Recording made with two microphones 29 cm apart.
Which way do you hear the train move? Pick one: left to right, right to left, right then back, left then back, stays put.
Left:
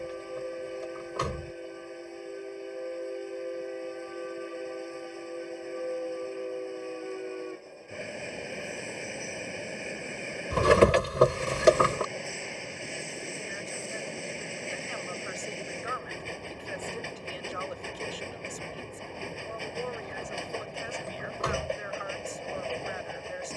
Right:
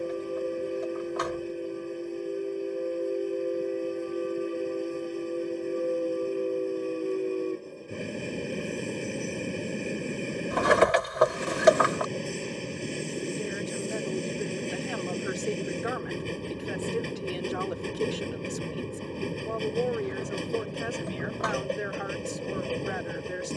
stays put.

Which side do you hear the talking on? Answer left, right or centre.
right.